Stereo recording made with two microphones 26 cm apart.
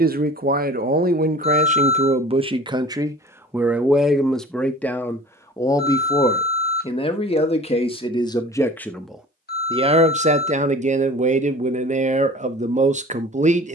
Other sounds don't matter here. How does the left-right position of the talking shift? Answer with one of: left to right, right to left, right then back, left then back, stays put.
left then back.